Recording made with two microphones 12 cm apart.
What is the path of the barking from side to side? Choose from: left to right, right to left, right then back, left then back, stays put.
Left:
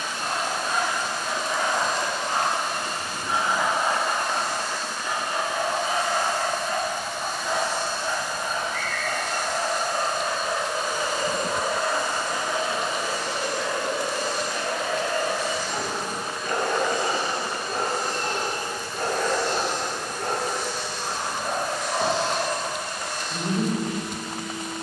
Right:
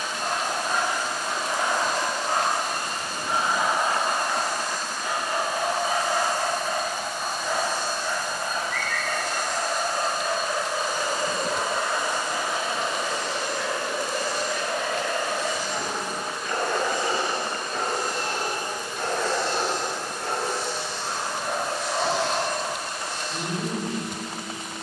right to left.